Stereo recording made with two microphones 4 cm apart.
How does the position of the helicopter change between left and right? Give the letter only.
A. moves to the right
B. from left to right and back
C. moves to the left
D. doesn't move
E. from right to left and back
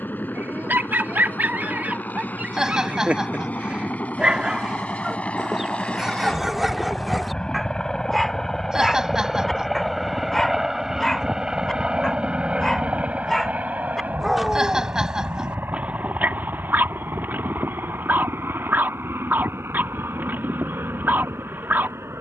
A.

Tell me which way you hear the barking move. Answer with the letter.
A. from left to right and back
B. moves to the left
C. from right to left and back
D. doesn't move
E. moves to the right
C.